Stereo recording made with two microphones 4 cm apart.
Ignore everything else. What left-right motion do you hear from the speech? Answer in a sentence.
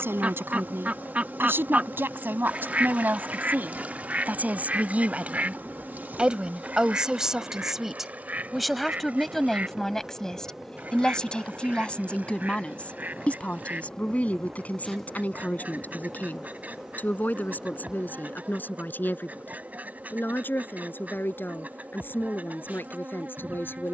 In this clip you hear the speech go from the right side to the left.